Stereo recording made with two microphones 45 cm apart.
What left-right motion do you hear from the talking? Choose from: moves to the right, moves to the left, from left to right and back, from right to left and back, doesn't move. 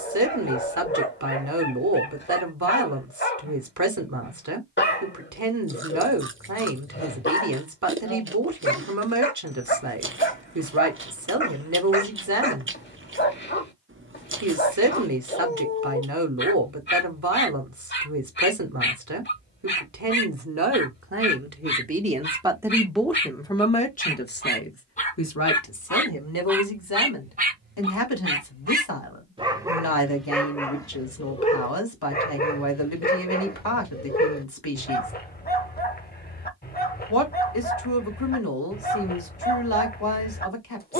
moves to the left.